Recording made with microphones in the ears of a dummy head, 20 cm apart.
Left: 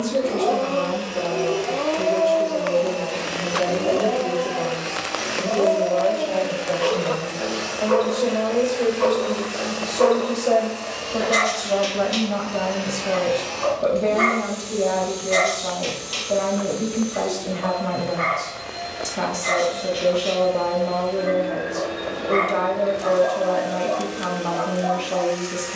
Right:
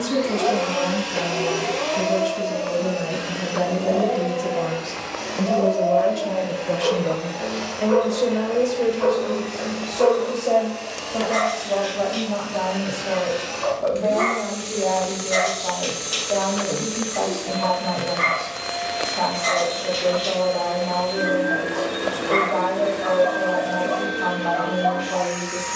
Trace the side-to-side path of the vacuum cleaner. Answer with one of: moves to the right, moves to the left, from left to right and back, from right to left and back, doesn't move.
from right to left and back.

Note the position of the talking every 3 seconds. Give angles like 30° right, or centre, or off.
80° right, 70° right, 30° right, 10° left, 30° left, 30° left, 30° left, 30° left, 30° left.